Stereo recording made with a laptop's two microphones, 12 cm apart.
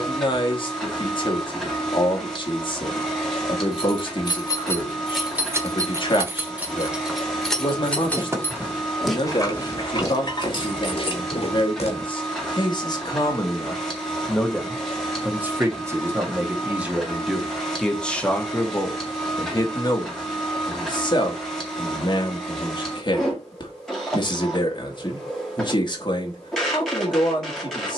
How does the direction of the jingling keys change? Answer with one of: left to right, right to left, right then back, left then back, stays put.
right then back.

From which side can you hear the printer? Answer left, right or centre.
centre.